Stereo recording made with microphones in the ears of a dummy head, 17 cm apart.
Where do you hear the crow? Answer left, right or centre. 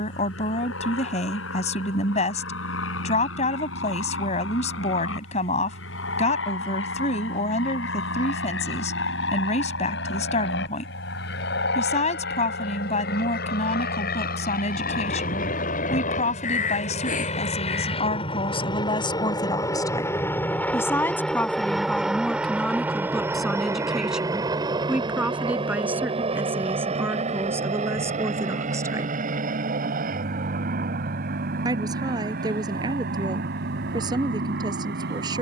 left.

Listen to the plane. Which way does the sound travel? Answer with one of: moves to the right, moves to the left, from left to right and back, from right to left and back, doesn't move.
moves to the right.